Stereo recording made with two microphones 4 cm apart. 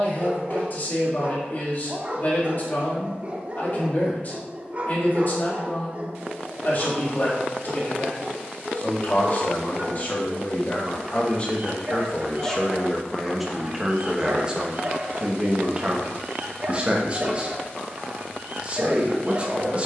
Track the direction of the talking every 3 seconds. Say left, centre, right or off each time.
left, left, left, left, centre, right, right.